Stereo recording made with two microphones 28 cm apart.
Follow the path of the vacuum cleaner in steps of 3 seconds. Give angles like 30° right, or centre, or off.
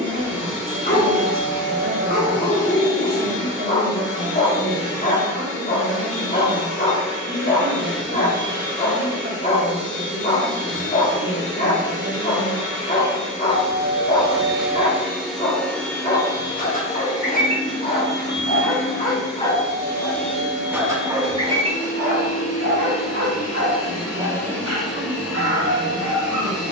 30° right, 30° right, 30° right, 30° right, 20° right, 20° left, 50° left, 40° left, 10° right.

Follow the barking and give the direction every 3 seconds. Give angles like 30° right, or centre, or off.
30° left, 30° left, 30° left, 30° left, 30° left, 30° left, 20° left, 40° right, 60° right.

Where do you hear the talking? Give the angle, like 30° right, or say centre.
50° right.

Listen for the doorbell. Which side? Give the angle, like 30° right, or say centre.
80° right.